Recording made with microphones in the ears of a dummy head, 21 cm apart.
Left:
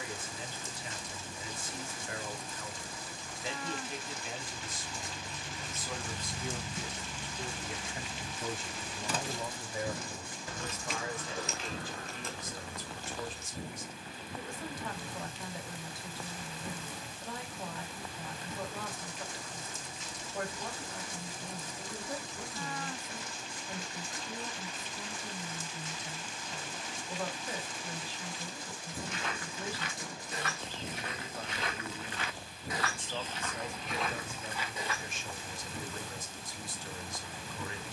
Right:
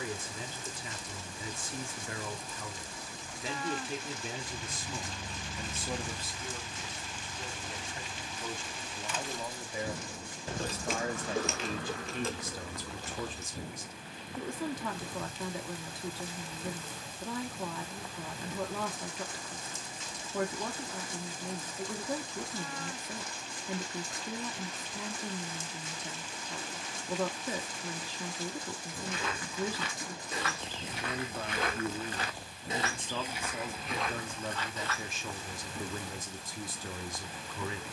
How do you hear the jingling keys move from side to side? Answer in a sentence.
In this clip you hear the jingling keys move from right to left and back again.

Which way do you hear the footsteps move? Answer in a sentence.
You can hear the footsteps travel towards the left.